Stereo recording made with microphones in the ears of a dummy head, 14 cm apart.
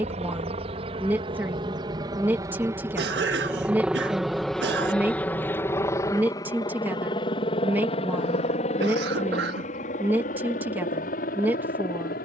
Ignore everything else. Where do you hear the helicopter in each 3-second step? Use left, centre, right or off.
right, centre, left, left.